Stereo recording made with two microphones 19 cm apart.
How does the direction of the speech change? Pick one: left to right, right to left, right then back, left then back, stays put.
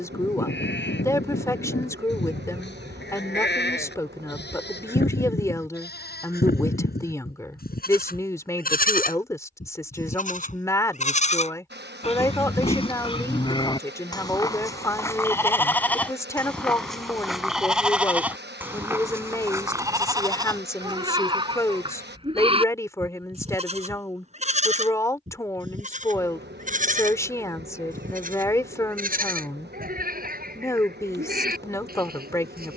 stays put.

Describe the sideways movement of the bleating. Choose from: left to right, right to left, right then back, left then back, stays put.
left to right.